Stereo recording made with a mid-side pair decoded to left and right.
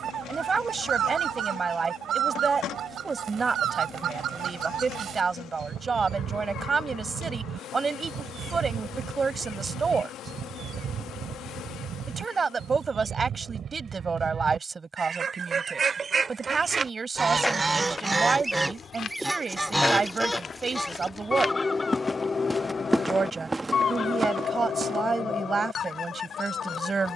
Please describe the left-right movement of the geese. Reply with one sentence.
You can hear the geese move from right to left.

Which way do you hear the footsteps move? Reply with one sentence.
You can hear the footsteps move from right to left and back again.